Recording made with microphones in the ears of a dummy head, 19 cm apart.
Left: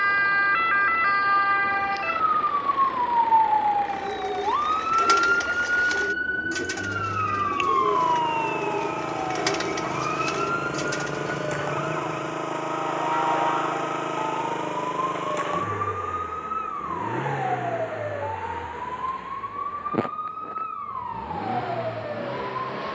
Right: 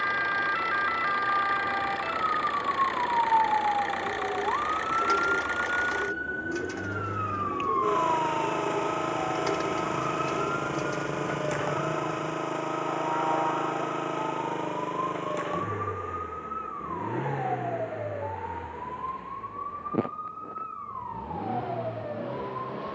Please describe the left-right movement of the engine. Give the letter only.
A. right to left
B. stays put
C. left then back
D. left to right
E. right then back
A.